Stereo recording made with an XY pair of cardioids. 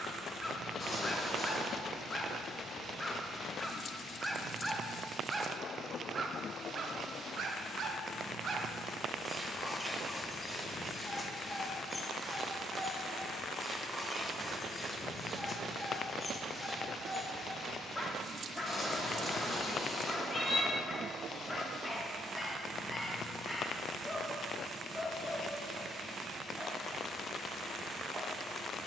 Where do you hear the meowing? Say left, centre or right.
left.